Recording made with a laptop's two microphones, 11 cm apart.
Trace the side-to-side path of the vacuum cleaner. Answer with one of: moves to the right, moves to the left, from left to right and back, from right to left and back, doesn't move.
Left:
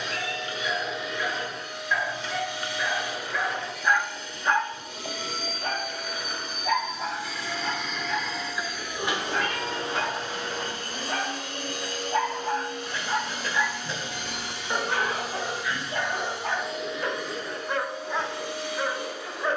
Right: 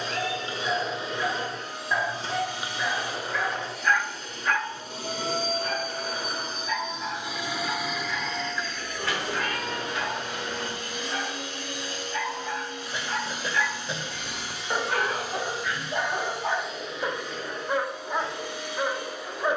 moves to the left.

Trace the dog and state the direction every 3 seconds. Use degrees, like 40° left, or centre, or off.
20° right, 20° left, 70° left, 60° left, 20° left, 10° right, 10° right.